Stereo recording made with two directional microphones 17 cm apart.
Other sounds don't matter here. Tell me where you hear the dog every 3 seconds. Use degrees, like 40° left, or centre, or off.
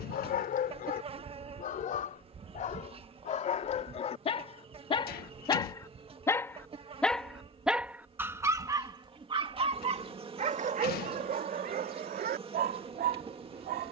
50° left, 30° left, 10° right, 40° right, 60° right.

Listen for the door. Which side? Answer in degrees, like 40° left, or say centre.
60° left.